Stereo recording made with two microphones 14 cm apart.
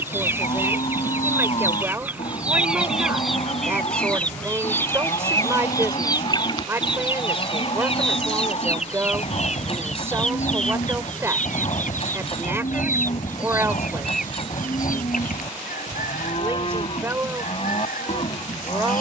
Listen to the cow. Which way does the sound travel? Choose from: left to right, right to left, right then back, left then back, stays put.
stays put.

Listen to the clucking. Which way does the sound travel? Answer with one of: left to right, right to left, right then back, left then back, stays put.
right to left.